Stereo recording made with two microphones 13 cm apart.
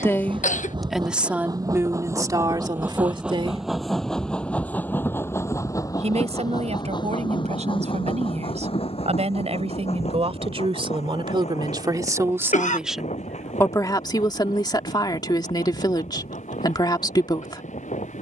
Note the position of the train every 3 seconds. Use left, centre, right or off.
right, centre, left, left, left, left.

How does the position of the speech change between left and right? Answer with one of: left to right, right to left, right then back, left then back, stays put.
right then back.